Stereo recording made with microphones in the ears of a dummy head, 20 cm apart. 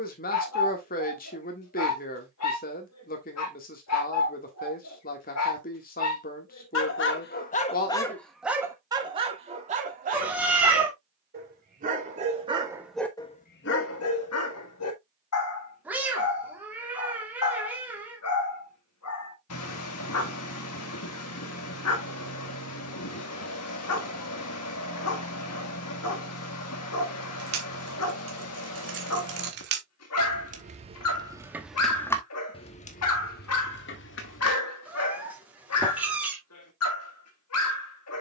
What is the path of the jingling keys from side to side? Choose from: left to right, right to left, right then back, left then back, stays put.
right to left.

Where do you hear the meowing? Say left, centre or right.
centre.